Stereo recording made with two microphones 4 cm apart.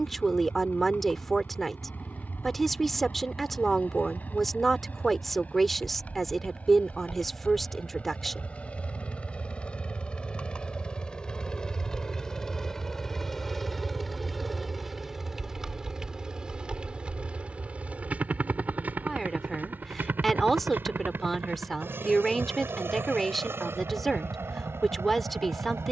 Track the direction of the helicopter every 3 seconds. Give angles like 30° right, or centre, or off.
50° left, 40° left, 30° left, 20° left, 10° left, 20° right, 40° right, 60° right, 70° right.